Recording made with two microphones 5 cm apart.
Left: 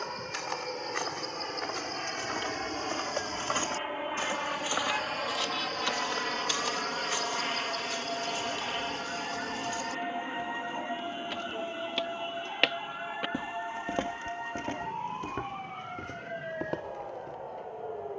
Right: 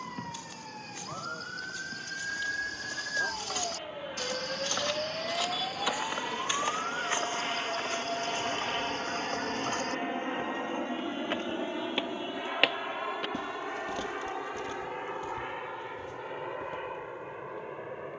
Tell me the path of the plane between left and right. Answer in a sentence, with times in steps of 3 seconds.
In this clip you hear the plane on the left from 0 s, in the centre from 6 s and on the right from 9 s.